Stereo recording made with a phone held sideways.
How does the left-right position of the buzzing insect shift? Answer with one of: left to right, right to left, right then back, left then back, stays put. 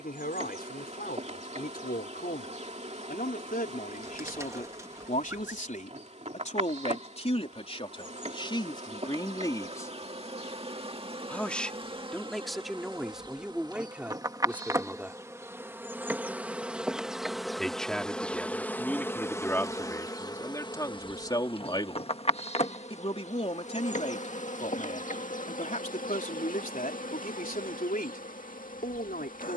right to left.